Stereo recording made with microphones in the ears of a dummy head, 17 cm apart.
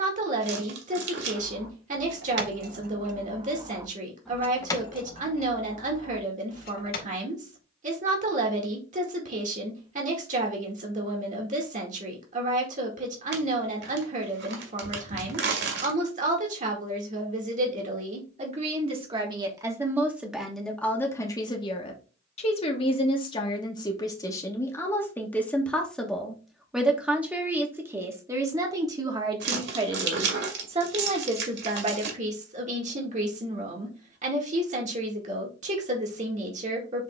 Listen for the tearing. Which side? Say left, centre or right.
right.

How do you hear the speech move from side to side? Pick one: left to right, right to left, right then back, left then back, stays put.
left then back.